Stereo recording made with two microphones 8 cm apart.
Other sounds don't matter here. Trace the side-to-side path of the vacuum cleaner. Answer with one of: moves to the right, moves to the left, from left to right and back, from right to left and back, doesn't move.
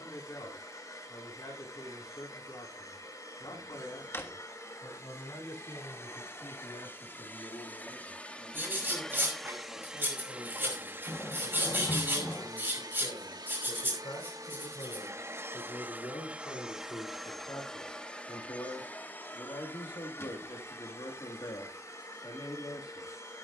from left to right and back.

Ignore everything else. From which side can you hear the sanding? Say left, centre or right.
right.